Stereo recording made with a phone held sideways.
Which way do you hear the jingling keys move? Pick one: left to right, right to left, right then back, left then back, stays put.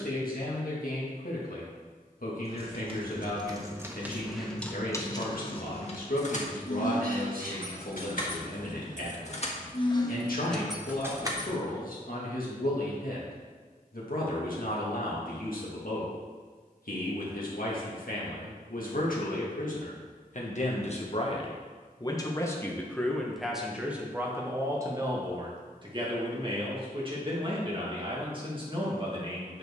left then back.